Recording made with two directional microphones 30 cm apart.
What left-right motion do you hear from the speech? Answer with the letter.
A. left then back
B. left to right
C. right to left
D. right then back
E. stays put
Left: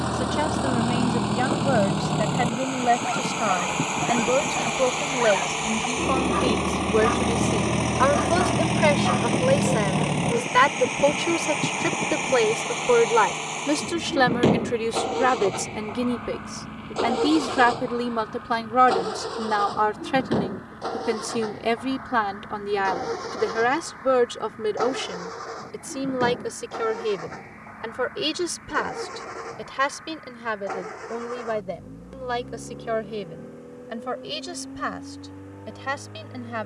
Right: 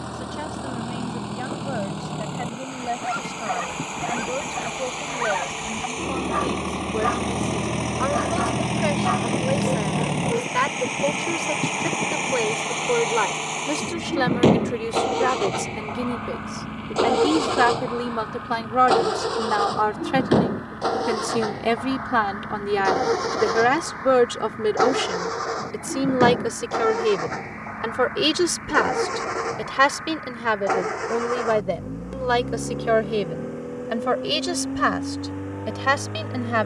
B.